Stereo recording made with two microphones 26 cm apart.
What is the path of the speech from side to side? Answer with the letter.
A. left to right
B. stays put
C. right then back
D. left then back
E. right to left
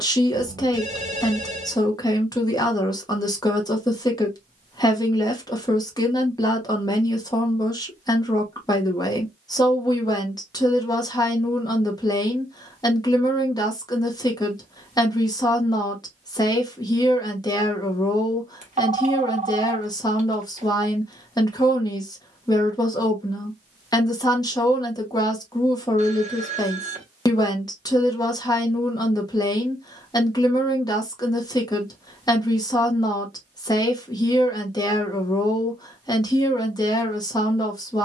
B.